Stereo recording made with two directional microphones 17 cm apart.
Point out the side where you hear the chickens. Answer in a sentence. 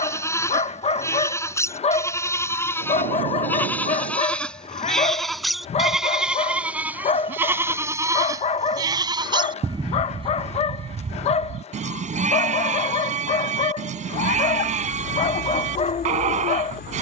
In this clip you hear the chickens on the left.